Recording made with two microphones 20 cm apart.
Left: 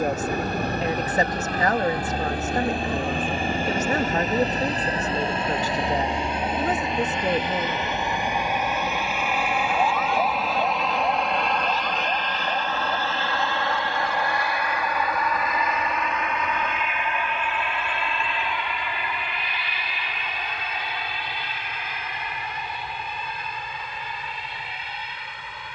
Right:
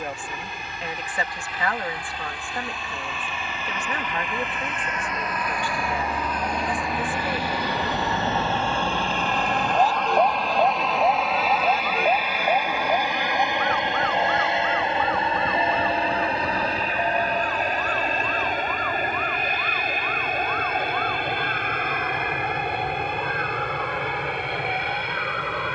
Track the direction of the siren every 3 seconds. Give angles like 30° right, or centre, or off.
70° left, 40° left, 10° right, 40° right, 60° right, 60° right, 70° right, 70° right, 70° right.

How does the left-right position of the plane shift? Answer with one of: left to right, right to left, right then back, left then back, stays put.
left to right.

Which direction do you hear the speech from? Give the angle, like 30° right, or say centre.
40° left.